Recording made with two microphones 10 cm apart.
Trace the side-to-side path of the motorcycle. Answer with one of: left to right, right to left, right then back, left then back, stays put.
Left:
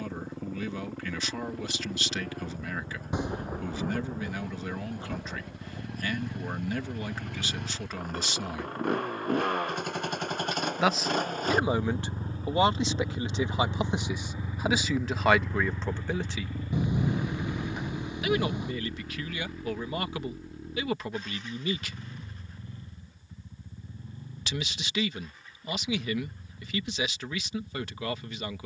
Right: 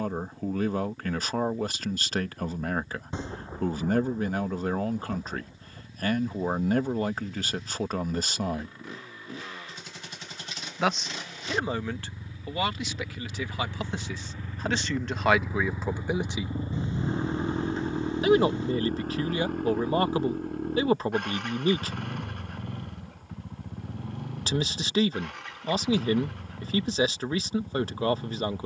left to right.